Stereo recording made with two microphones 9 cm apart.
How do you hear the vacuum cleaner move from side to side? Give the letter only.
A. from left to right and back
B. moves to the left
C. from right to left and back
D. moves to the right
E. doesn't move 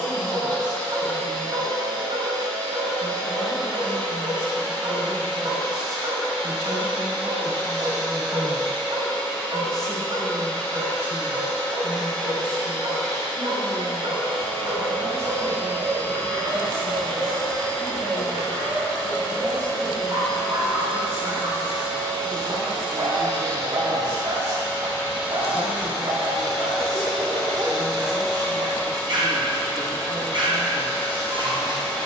A.